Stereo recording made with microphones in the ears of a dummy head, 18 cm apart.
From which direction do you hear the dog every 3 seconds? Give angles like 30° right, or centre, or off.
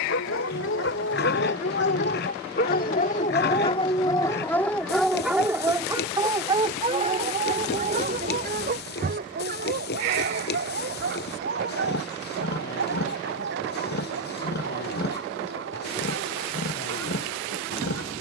60° left, 10° left, 30° right, 50° right, 60° right, 60° right.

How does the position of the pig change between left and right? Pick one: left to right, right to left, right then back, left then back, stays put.
stays put.